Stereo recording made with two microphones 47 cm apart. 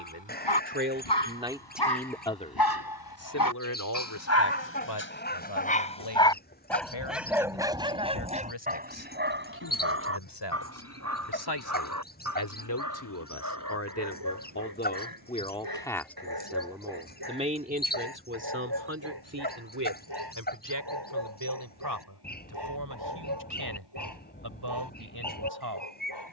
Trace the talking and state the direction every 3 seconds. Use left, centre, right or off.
centre, left, left, left, left, centre, right, right, right.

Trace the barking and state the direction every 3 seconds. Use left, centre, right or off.
left, left, centre, right, right, right, right, right, right.